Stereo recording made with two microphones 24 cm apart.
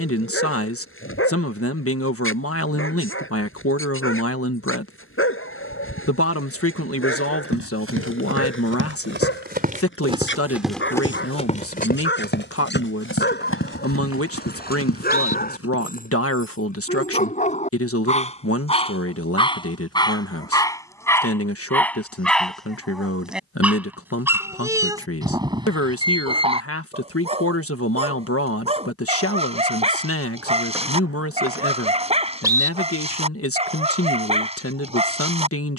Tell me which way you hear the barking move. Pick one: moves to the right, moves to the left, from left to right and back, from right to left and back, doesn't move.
moves to the right.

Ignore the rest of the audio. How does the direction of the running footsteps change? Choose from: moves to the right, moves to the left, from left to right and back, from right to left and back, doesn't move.
moves to the left.